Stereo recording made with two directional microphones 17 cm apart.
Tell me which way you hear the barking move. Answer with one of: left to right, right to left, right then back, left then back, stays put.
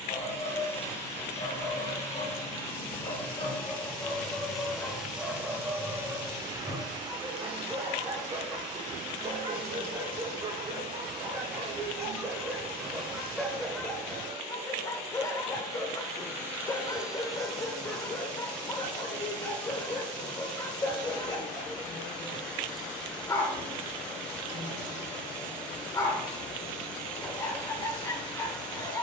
right then back.